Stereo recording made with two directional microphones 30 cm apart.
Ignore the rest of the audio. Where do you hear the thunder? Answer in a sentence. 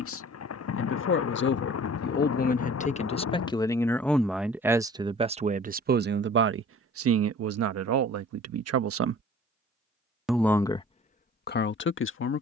In this clip you hear the thunder on the left.